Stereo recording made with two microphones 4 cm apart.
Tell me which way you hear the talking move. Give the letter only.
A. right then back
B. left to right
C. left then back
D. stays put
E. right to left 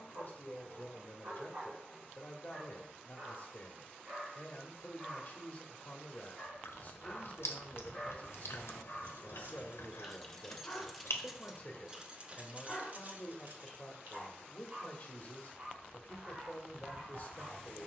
D.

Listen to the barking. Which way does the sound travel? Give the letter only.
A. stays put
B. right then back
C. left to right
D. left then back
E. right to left
D.